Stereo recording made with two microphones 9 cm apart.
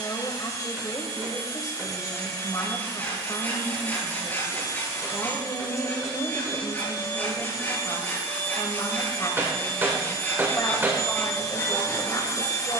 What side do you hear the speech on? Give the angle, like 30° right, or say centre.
40° left.